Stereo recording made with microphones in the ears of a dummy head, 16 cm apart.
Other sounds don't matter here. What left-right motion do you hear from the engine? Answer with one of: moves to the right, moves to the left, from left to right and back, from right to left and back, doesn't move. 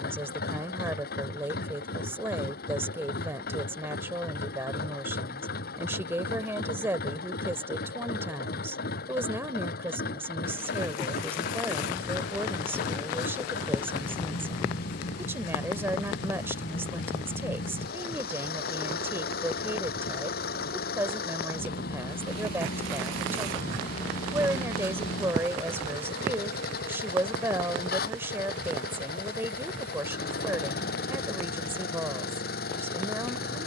doesn't move.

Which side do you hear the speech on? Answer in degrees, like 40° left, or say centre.
10° right.